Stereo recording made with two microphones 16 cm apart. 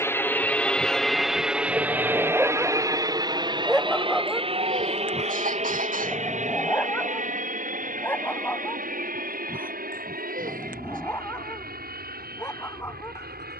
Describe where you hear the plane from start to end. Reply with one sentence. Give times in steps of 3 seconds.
In this clip you hear the plane in the centre from 0 s and on the right from 3 s.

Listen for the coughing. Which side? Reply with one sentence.
You can hear the coughing on the right.